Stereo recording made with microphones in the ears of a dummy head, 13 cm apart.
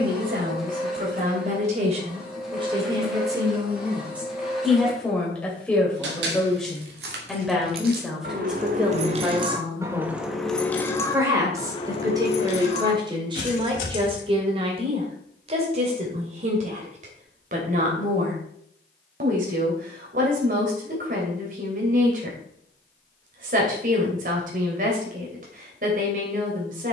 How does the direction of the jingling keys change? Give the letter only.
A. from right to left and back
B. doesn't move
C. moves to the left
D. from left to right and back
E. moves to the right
C.